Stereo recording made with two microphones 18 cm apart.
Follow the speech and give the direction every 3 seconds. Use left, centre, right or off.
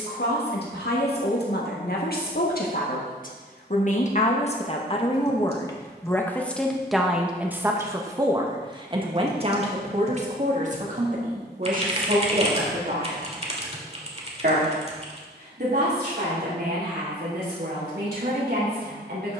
left, left, centre, right, right, right, right.